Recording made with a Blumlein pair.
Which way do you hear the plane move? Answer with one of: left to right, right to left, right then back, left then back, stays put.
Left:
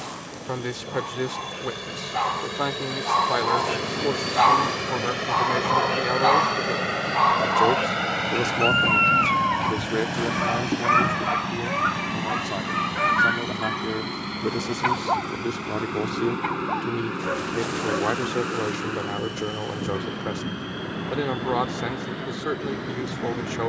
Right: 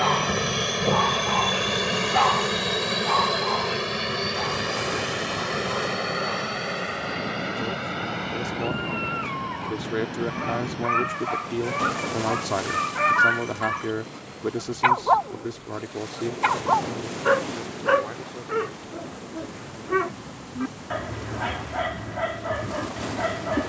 right to left.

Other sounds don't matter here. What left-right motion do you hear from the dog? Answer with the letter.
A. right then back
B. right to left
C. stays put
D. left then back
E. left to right
D.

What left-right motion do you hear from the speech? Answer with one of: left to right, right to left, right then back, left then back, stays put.
right then back.